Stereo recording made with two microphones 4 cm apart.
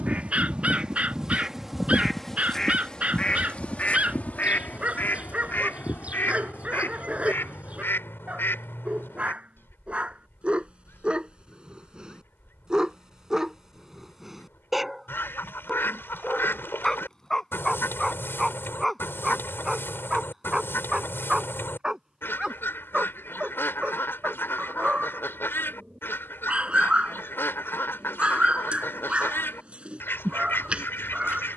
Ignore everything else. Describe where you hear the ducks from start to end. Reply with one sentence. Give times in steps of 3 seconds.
In this clip you hear the ducks in the centre from 0 s and on the left from 3 s.